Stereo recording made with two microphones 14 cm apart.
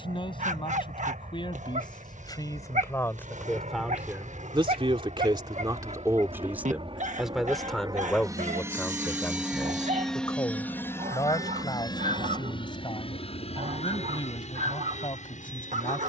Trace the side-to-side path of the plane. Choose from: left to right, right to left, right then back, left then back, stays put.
right to left.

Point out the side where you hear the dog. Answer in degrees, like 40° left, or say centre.
60° right.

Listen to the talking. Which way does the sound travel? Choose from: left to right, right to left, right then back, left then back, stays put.
right then back.